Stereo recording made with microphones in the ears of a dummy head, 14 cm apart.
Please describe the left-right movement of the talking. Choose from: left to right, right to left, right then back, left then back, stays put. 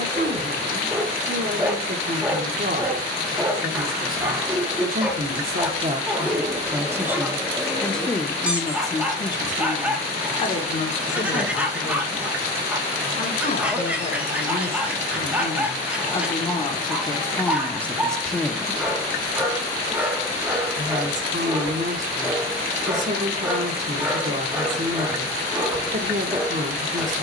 left then back.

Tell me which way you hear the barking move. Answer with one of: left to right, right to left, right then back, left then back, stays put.
stays put.